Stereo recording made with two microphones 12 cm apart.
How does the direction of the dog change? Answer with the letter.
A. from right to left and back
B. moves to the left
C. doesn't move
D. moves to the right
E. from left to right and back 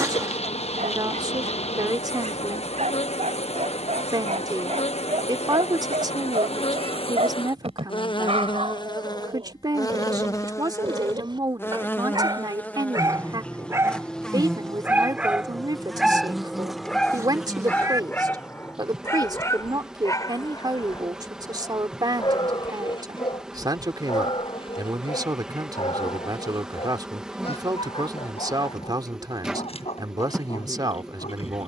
B.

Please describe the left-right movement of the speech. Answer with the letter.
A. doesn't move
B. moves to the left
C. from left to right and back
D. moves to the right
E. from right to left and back
A.